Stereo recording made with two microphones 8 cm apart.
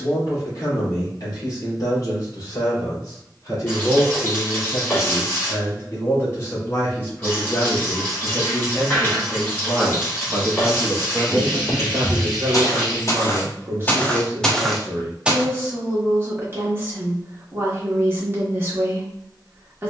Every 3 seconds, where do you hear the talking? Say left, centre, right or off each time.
left, left, left, centre, right, right, right.